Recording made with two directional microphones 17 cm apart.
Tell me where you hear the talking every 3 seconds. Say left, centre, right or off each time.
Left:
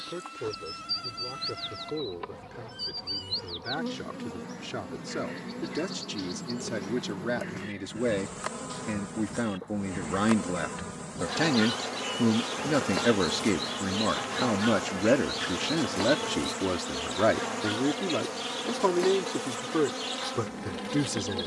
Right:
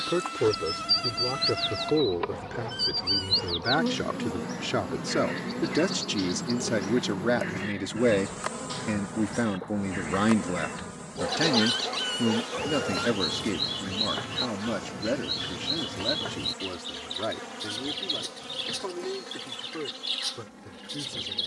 right, right, right, centre, left, left, left.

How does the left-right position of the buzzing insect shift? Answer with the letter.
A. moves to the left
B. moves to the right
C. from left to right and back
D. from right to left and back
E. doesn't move
A.